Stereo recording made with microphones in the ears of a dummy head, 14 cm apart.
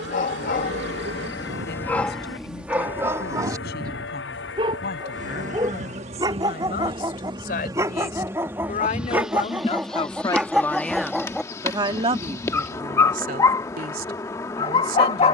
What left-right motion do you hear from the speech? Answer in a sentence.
You can hear the speech move from left to right.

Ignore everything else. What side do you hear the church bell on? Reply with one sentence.
In this clip you hear the church bell on the left.